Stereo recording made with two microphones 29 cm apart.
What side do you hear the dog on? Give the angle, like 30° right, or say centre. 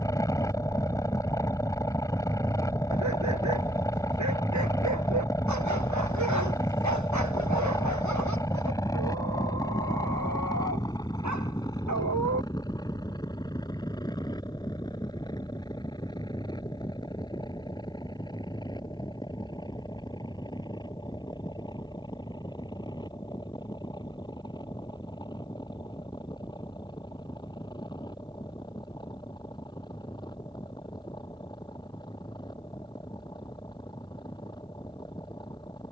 80° right.